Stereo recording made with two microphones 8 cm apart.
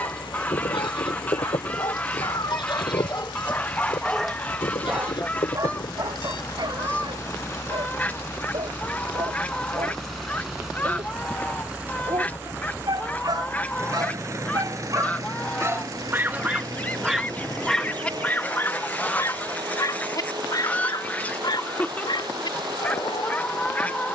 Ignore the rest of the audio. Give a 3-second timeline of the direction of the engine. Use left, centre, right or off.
left, left, left, centre, right, right, right, right.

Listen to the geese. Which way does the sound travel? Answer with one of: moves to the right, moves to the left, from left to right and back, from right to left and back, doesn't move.
doesn't move.